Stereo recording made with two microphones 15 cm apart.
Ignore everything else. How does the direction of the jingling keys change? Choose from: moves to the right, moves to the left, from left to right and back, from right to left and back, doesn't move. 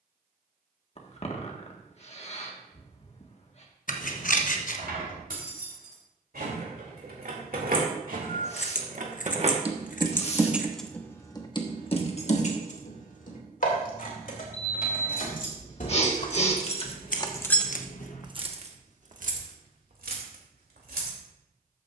from right to left and back.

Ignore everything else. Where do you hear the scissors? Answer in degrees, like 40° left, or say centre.
60° left.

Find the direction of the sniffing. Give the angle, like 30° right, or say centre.
40° left.